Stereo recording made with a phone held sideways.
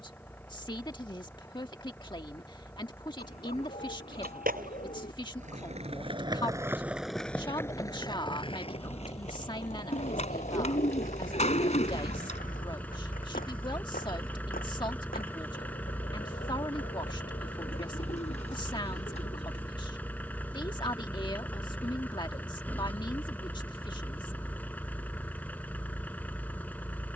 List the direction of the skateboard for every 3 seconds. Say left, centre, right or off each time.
off, right, centre, left, left, left, off, off, off.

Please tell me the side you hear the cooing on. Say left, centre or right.
left.